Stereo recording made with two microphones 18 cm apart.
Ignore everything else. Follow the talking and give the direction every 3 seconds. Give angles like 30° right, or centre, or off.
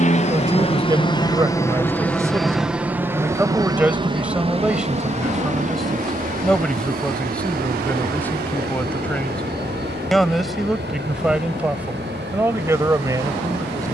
20° right, 10° right, 10° left, centre, 20° right.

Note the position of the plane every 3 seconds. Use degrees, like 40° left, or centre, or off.
20° left, 30° right, 50° right, 60° right, 60° right.